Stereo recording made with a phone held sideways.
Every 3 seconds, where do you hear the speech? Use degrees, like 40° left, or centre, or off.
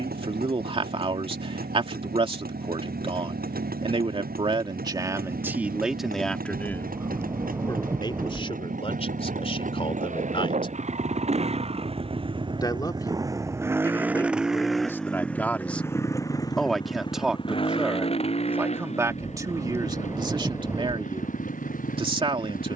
40° right, 30° right, 20° left, 40° left, 20° left, centre, 20° right, 30° right.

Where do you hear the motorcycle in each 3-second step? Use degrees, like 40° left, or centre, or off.
80° right, 70° right, 70° right, 50° right, 20° right, 20° left, 50° left, 60° left.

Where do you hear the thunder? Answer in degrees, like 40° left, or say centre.
20° right.